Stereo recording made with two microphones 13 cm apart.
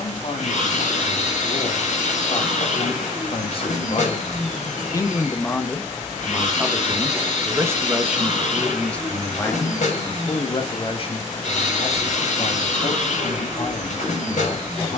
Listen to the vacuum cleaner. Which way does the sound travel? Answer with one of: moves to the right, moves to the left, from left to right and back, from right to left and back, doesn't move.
doesn't move.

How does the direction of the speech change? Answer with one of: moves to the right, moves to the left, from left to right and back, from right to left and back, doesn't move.
from left to right and back.